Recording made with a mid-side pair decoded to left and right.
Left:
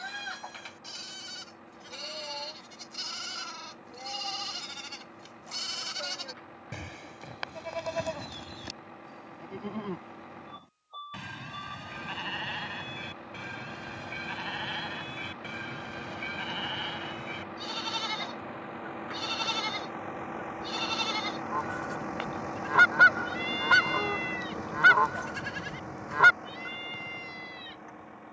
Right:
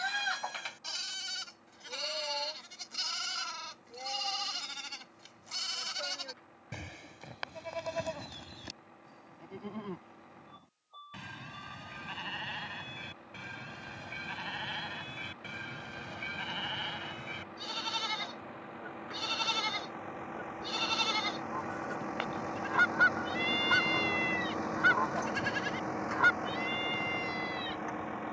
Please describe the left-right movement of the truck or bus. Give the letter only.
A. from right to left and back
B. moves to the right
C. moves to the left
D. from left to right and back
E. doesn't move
B.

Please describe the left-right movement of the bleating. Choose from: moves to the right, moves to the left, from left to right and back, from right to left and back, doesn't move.
from right to left and back.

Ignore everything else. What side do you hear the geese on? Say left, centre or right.
left.